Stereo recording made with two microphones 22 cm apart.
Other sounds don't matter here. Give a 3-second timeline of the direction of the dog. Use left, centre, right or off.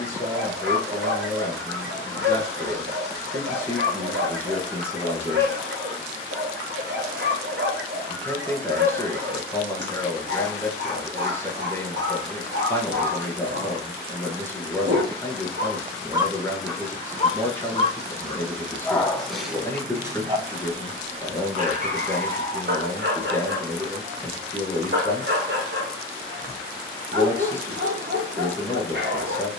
right, right, right, right, right, centre, centre, right, right, right.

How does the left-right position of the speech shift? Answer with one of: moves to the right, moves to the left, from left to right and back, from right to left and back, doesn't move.
doesn't move.